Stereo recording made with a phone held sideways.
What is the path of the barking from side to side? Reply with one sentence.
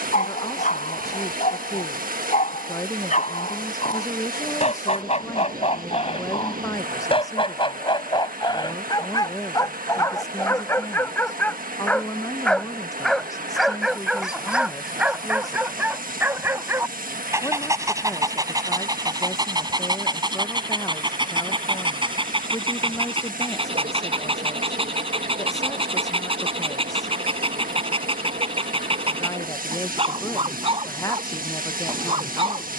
In this clip you hear the barking move from left to right.